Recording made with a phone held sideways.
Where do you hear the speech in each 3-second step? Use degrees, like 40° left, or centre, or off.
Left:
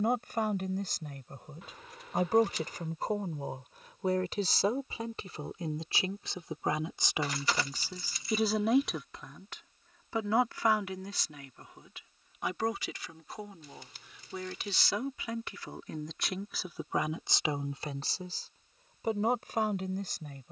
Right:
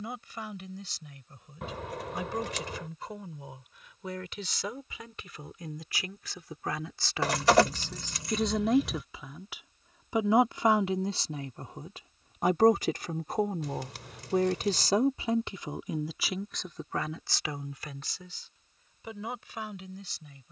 50° left, 40° left, 10° left, 20° right, 50° right, centre, 50° left.